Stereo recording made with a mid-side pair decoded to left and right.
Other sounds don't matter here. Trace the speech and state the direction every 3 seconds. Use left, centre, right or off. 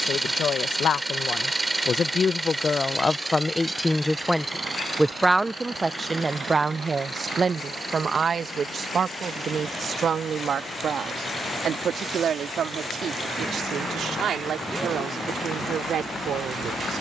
left, centre, right, right, right, right.